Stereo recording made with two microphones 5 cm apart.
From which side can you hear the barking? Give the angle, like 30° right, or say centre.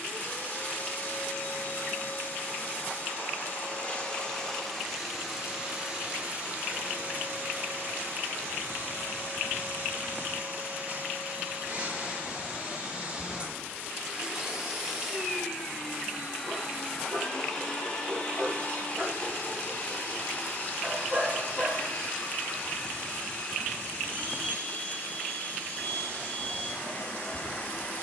30° right.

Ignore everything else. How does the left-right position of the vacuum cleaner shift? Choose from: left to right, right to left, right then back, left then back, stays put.
right then back.